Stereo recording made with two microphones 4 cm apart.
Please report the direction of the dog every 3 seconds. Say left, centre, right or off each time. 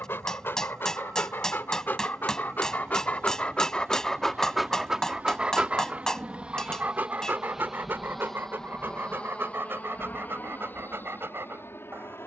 left, centre, right, right.